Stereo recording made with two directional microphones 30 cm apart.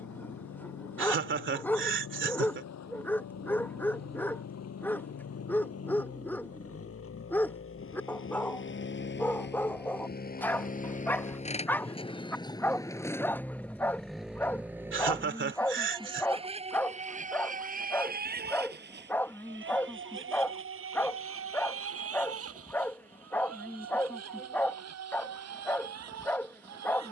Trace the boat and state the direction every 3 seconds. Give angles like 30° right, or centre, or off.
60° left, 60° left, 50° left, 30° left, centre, 20° right, 40° right, 50° right, 60° right.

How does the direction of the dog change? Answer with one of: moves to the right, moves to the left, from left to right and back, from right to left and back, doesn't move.
doesn't move.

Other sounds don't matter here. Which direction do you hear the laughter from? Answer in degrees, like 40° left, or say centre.
40° right.